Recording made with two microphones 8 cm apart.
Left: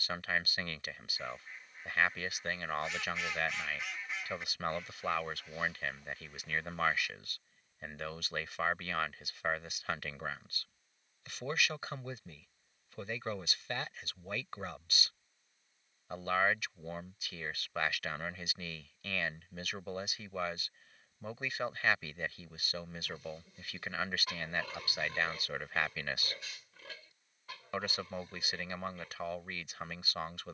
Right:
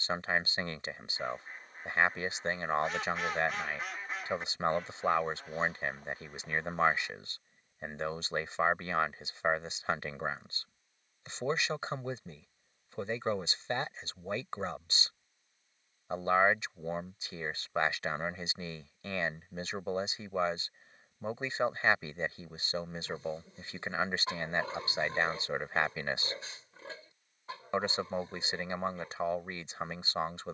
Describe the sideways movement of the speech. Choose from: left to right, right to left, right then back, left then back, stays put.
stays put.